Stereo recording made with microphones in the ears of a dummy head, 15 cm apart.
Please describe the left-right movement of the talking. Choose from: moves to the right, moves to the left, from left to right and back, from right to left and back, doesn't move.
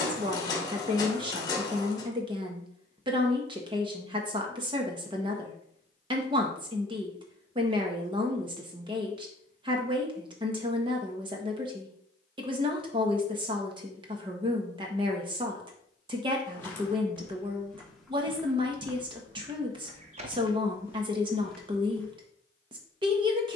doesn't move.